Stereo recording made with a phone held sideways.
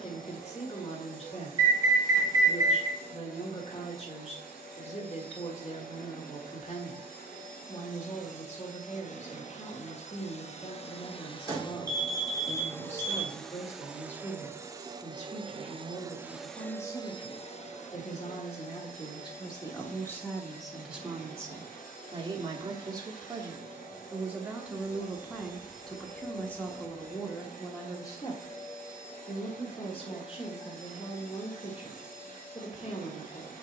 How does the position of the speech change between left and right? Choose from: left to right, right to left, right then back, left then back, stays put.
right then back.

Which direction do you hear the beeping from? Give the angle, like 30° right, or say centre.
20° right.